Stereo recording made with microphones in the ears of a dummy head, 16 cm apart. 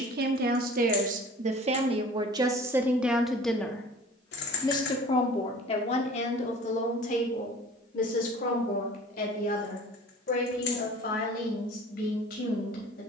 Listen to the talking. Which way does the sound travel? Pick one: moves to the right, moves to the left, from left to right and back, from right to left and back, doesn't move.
moves to the left.